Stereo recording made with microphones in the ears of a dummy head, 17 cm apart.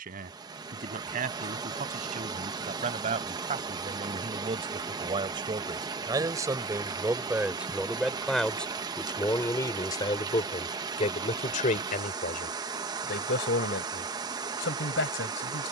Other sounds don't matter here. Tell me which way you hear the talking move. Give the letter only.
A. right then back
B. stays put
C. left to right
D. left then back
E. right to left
E.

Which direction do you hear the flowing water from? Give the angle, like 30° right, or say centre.
20° right.